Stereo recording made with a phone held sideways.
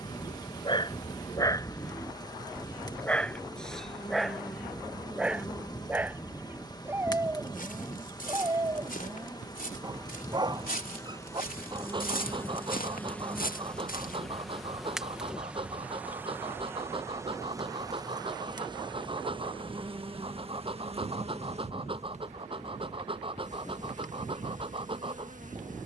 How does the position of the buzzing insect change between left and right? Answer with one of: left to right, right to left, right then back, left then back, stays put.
left to right.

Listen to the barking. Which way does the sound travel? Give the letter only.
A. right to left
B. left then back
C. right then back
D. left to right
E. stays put
D.